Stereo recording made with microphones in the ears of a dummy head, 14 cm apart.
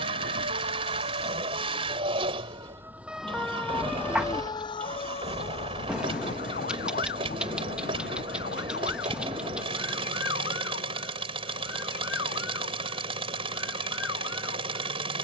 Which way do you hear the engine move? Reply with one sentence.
In this clip you hear the engine stay in one place.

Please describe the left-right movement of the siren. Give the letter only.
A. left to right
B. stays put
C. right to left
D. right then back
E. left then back
C.